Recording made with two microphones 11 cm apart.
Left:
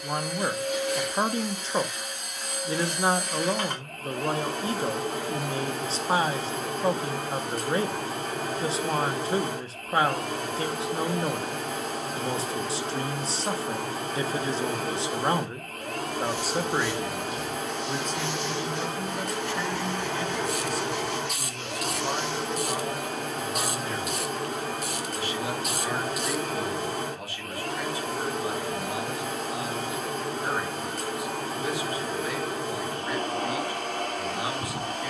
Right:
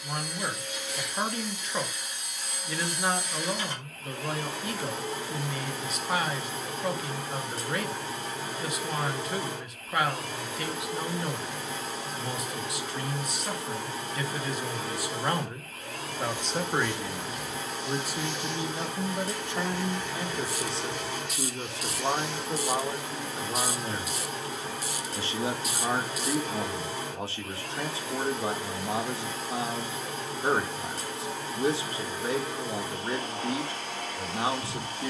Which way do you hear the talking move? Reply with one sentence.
In this clip you hear the talking go from the left side to the right.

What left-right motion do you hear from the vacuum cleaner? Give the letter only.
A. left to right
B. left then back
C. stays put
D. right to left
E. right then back
C.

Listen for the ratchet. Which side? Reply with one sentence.
In this clip you hear the ratchet on the left.